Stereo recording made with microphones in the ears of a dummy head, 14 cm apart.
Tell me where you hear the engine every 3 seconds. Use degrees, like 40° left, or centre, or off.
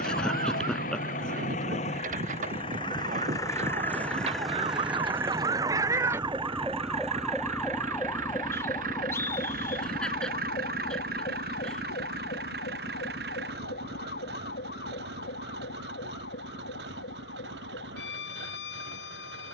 50° left, centre, 40° right, 60° right, 70° right, 70° right, 70° right.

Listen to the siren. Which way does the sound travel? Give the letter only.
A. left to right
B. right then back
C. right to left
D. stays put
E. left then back
C.